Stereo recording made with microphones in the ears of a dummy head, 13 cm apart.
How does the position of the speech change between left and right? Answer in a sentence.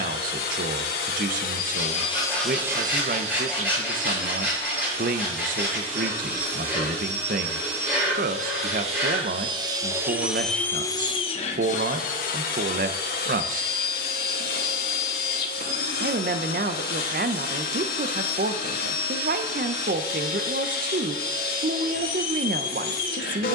In this clip you hear the speech stay put.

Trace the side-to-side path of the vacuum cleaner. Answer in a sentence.
In this clip you hear the vacuum cleaner go right and come back.